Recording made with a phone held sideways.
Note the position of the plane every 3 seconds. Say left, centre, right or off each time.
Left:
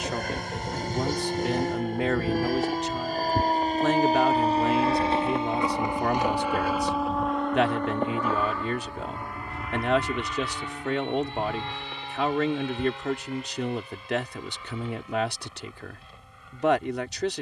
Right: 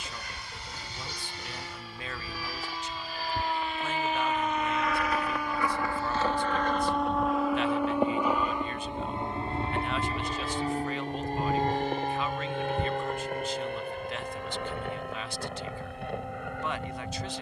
left, left, centre, right, right, right.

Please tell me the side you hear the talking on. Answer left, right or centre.
left.